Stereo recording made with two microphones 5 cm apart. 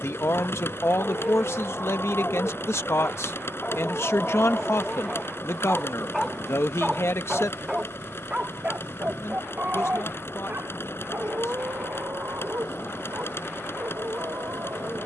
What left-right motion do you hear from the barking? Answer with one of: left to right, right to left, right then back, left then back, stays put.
left to right.